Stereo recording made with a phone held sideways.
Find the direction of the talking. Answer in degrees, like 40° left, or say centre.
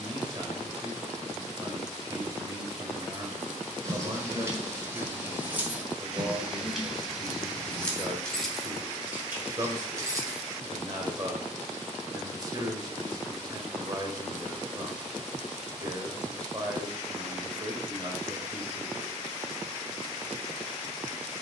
30° right.